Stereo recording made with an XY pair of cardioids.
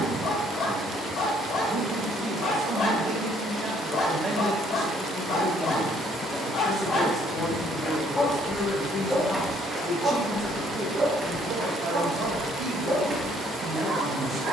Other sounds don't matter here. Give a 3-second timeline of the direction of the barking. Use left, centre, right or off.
left, left, left, right, right.